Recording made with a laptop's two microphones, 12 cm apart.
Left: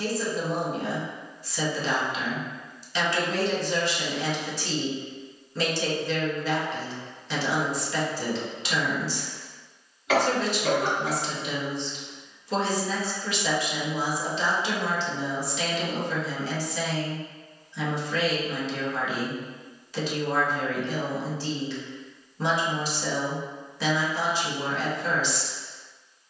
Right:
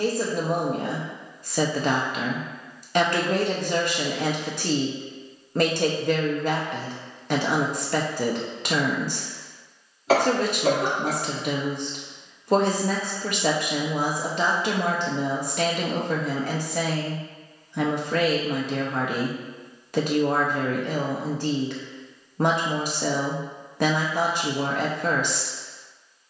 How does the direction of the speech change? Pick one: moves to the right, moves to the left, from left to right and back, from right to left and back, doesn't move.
doesn't move.